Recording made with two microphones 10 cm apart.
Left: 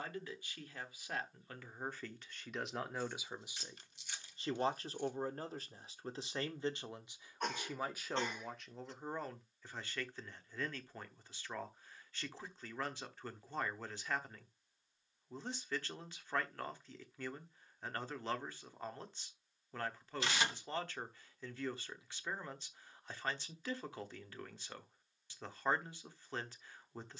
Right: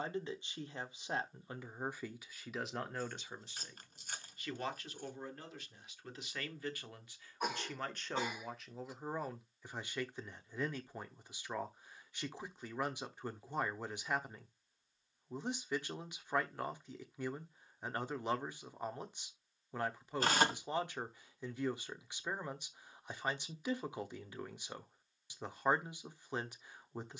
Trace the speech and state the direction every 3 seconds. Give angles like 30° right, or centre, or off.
10° right, 30° left, 10° left, 10° right, 10° right, 10° right, 10° right, 10° right, 10° right.